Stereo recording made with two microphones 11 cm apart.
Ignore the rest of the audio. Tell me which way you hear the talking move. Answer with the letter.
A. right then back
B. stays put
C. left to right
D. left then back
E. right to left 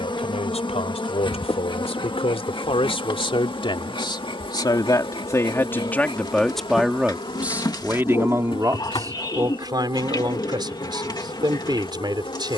C.